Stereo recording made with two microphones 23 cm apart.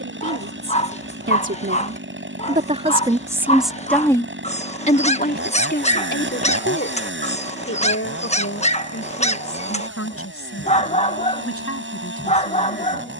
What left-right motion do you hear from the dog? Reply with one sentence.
In this clip you hear the dog stay in one place.